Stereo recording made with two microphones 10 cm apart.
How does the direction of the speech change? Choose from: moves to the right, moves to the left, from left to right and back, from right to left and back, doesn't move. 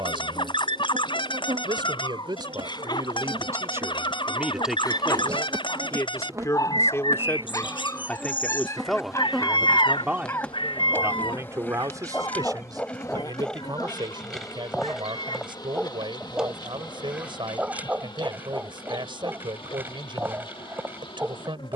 from right to left and back.